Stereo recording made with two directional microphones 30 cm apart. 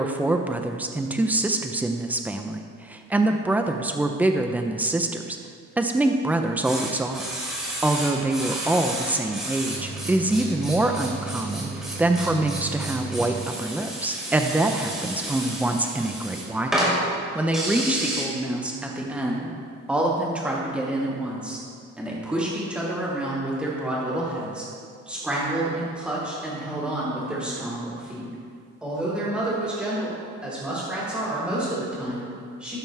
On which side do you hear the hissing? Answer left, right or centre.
centre.